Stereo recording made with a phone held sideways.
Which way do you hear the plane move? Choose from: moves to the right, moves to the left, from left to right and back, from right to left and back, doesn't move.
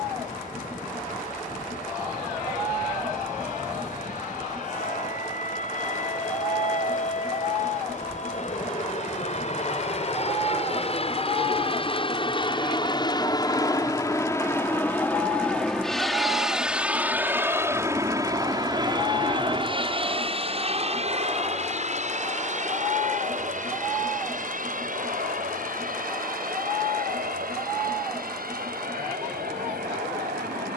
moves to the right.